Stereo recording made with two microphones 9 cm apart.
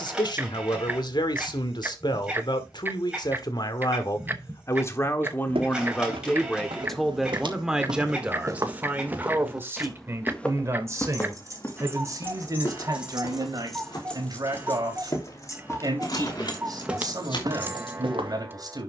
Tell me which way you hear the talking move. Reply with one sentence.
You can hear the talking travel towards the right.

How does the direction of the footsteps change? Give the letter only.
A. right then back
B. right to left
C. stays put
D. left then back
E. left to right
D.